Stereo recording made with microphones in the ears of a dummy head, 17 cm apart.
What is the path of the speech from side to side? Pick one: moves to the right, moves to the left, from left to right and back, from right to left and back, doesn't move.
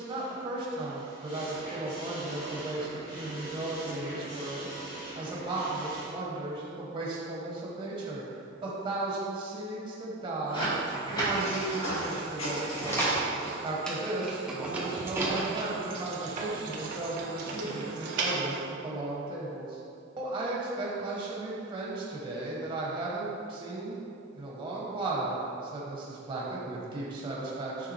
doesn't move.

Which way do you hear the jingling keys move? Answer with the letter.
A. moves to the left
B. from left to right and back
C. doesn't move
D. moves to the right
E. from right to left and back
D.